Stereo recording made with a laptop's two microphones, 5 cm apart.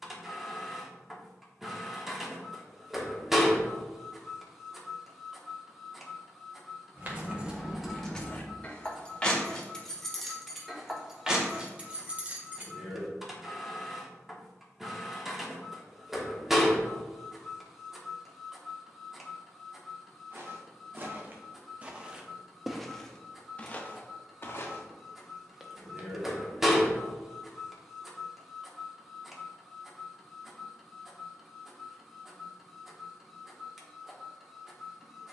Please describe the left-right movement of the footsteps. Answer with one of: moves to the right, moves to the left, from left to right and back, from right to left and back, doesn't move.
from right to left and back.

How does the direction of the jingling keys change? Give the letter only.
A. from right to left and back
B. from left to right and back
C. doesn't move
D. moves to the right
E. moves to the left
A.